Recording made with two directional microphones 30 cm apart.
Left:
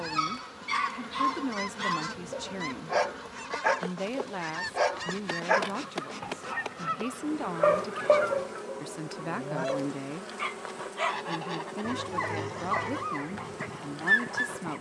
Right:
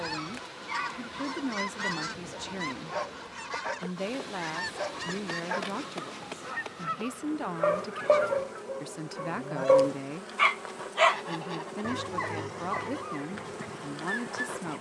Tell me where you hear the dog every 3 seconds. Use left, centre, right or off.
left, left, centre, right, left.